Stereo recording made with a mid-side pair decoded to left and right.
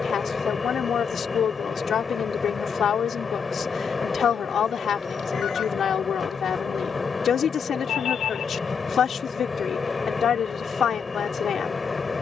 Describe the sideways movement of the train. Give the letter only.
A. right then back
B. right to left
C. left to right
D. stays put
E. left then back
D.